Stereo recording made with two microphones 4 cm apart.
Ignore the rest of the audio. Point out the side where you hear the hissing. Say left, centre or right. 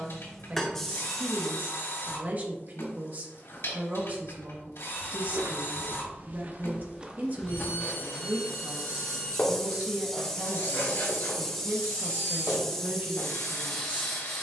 centre.